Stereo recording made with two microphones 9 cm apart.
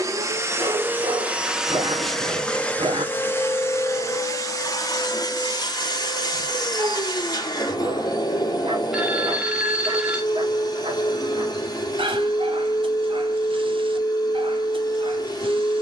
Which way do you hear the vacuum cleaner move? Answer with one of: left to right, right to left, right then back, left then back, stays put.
right to left.